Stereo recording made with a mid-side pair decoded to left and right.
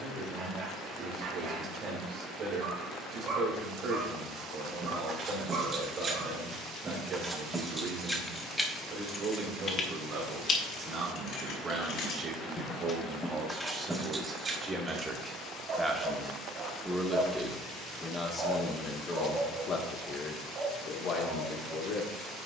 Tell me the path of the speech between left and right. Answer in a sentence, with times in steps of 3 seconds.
In this clip you hear the speech on the right from 0 s, in the centre from 15 s and on the left from 18 s.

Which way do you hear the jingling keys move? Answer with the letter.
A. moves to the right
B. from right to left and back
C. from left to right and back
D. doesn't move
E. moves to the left
B.